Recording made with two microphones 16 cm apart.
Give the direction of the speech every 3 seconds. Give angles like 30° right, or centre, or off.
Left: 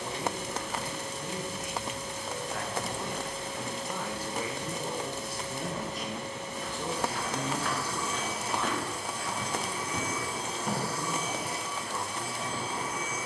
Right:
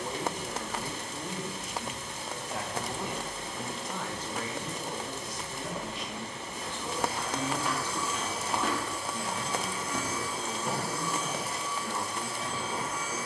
30° right, 10° left, 20° left, 40° right, 40° right.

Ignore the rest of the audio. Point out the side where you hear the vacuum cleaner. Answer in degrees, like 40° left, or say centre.
60° left.